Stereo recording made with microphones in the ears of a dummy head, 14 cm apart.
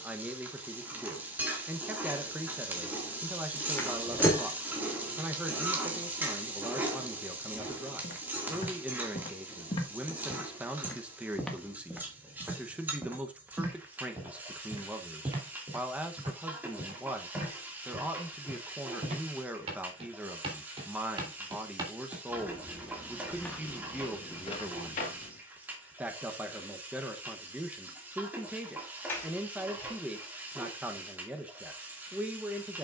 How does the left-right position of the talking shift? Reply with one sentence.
In this clip you hear the talking stay put.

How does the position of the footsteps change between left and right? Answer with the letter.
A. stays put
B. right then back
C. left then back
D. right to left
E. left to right
B.